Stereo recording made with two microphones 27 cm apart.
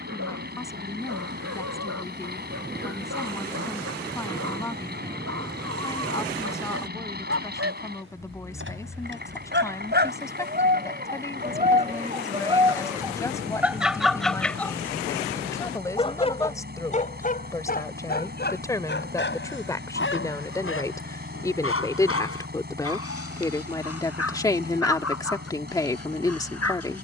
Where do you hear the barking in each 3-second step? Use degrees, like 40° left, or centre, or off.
70° right, 60° right, 50° right, 30° right, 10° right, 30° left, 40° left, 50° left, 60° left.